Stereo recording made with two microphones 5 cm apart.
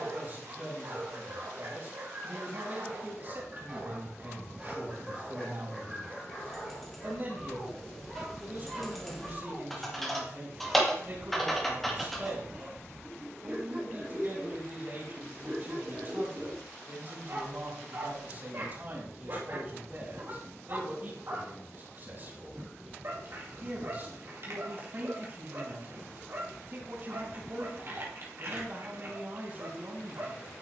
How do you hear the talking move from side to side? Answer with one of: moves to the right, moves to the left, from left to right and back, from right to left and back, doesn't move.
doesn't move.